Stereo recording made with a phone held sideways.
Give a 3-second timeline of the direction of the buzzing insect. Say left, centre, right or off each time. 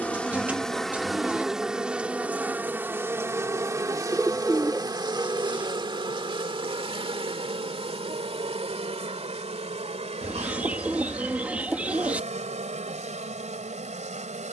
centre, right, right, right, right.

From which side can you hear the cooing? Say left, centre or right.
centre.